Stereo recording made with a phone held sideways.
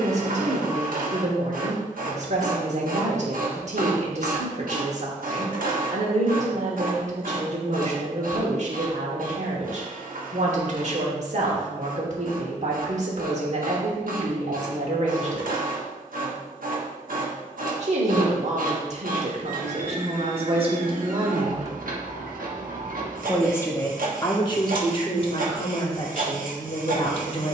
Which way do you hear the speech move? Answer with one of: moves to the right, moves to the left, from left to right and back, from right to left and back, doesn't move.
moves to the left.